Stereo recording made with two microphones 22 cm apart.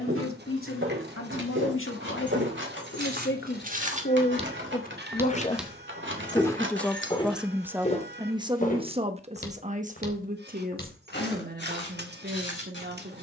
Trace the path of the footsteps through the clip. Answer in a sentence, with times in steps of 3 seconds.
You can hear the footsteps on the right from 0 s and on the left from 6 s.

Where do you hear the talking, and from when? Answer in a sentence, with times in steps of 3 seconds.
In this clip you hear the talking on the left from 0 s, in the centre from 6 s and on the right from 9 s.